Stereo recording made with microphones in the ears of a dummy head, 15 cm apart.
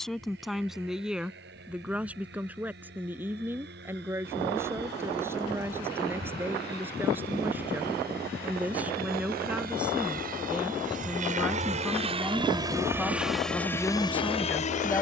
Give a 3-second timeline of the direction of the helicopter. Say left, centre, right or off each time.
right, right, right, right, centre.